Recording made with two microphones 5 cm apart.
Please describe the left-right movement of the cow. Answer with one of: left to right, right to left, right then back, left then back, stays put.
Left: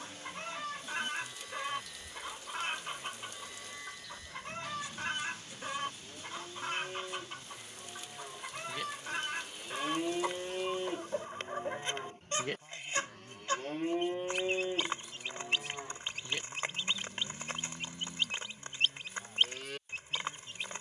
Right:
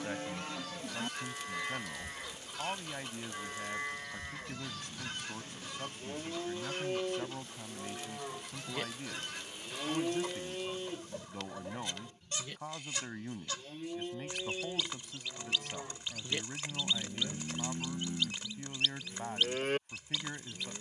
left then back.